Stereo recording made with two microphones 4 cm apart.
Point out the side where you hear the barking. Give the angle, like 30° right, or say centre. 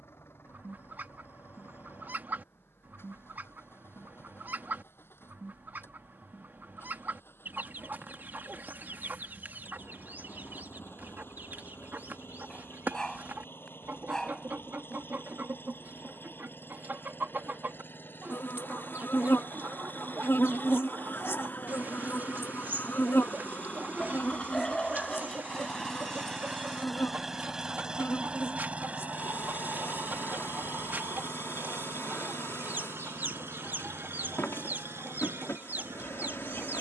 10° left.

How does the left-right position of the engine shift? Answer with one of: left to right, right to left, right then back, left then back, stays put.
left to right.